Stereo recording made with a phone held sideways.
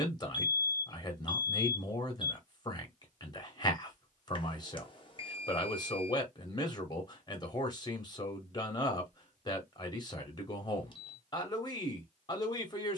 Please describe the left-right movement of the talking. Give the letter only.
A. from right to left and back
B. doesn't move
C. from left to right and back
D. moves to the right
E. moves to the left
B.